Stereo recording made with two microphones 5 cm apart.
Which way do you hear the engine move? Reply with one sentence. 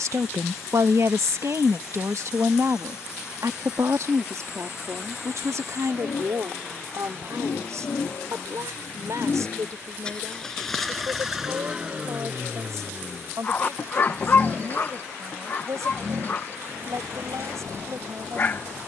You can hear the engine move to the right.